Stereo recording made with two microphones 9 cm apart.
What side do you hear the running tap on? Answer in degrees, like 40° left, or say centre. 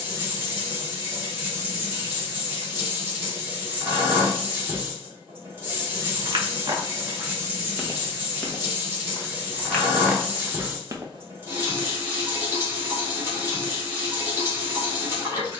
20° right.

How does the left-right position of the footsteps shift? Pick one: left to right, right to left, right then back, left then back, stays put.
left then back.